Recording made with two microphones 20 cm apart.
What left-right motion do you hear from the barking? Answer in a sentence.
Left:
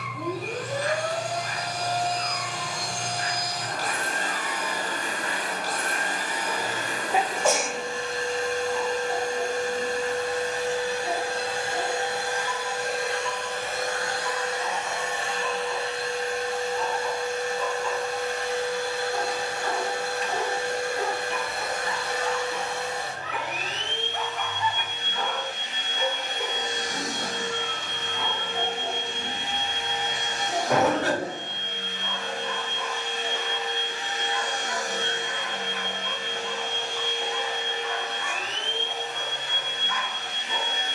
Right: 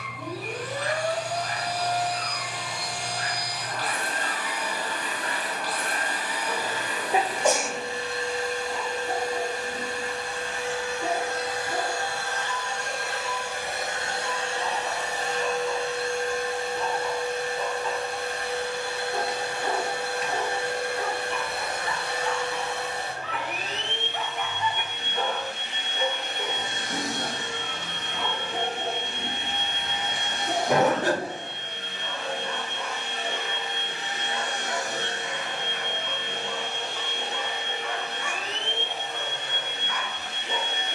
You can hear the barking move from right to left and back again.